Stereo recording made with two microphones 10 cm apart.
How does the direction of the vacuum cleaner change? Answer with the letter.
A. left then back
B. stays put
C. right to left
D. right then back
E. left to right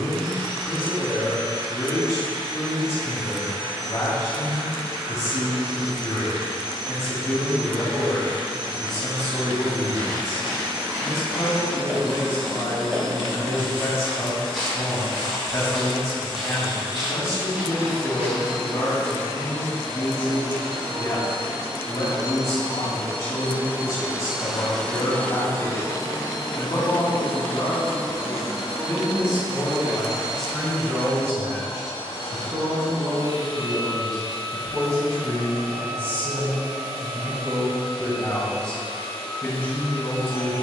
C.